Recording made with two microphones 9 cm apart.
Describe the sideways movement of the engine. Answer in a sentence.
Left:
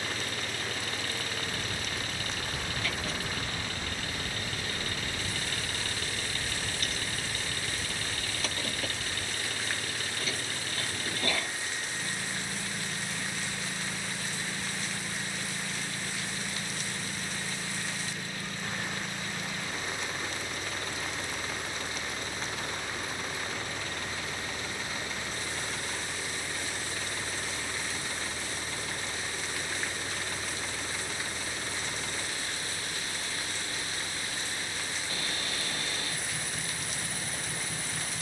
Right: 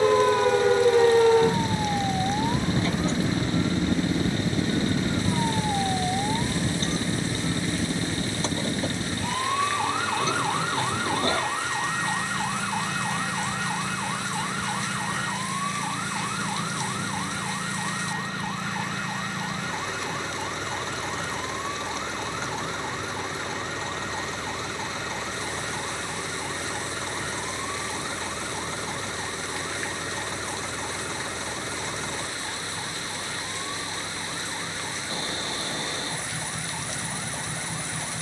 In this clip you hear the engine stay in one place.